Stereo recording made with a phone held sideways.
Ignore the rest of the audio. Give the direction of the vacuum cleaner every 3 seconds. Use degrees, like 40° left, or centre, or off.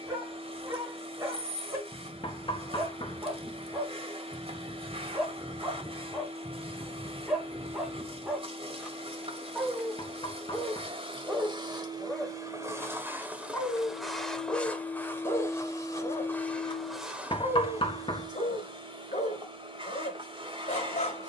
40° right, 40° right, 40° right, 40° right, 10° right, 10° left, 40° right.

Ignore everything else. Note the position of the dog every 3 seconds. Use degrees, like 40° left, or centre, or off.
20° right, 20° right, 10° right, centre, 20° left, 40° left, 50° left.